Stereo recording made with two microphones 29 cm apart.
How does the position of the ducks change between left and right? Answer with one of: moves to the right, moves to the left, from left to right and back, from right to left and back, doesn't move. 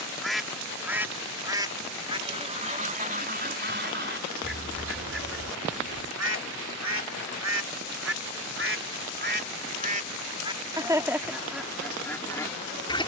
from left to right and back.